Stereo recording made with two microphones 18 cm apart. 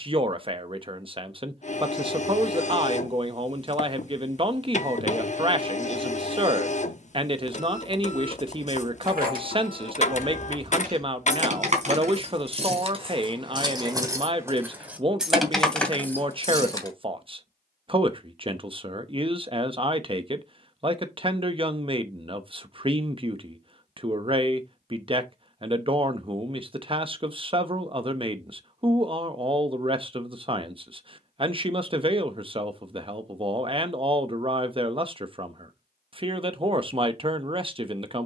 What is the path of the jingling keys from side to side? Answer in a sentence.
You can hear the jingling keys go from the right side to the left.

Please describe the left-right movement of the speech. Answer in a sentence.
You can hear the speech stay put.